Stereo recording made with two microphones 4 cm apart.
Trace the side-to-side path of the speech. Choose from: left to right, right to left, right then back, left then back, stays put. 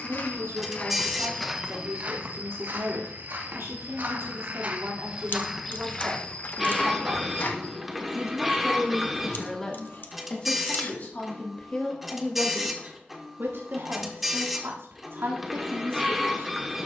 left then back.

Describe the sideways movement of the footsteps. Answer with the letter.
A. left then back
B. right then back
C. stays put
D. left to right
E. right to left
B.